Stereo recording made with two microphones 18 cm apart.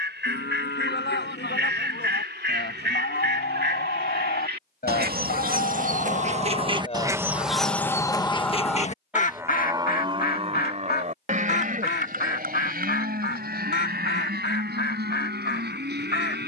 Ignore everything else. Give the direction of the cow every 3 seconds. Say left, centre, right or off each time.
left, left, left, right, right, right.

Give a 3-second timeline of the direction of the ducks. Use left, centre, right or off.
right, right, centre, left, left, left.